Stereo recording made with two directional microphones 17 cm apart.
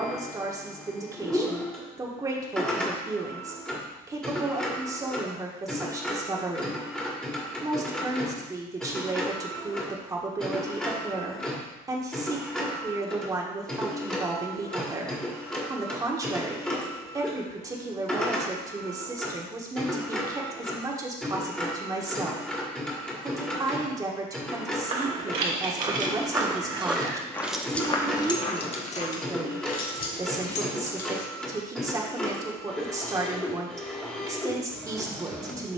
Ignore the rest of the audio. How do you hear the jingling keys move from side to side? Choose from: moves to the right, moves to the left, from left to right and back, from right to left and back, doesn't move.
moves to the left.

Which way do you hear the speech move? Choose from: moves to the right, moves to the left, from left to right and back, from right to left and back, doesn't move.
doesn't move.